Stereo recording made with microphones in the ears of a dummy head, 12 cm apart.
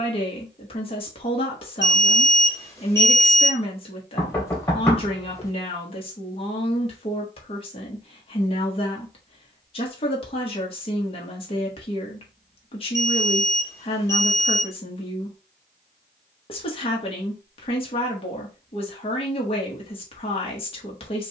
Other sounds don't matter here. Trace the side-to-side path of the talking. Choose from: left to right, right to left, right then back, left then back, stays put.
stays put.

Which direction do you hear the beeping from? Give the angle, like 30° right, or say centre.
20° left.